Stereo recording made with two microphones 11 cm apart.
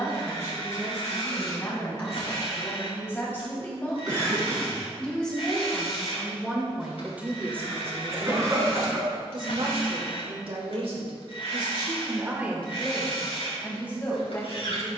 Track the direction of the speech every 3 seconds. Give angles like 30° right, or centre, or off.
30° left, 10° left, 20° right, 60° right, 10° left.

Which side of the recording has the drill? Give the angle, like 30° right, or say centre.
60° left.